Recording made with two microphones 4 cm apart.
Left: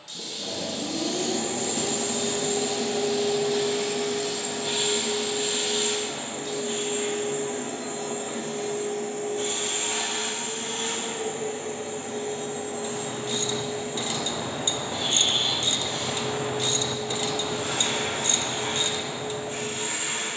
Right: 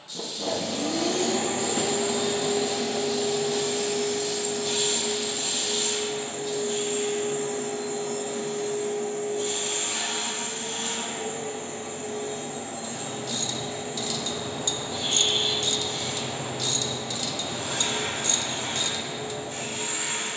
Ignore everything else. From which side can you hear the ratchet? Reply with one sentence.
In this clip you hear the ratchet on the left.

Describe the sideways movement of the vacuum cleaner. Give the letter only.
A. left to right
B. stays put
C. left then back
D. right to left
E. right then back
D.